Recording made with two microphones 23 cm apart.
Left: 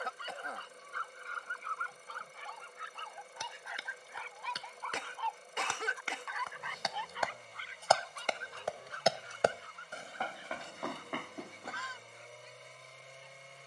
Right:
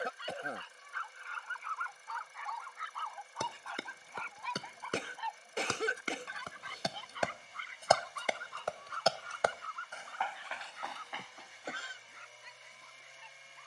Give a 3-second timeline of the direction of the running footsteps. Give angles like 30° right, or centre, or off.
off, 50° right, 20° right, 50° left, off.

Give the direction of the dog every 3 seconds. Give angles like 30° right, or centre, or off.
40° left, centre, 50° right, 70° right, 80° right.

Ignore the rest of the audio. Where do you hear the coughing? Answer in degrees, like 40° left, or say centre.
40° right.